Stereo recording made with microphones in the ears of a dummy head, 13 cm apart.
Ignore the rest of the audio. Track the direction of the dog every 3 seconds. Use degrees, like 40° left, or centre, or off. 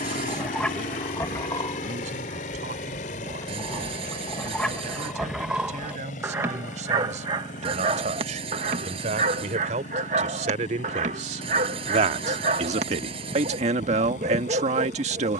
10° left, centre, 30° right, 50° right, 50° right.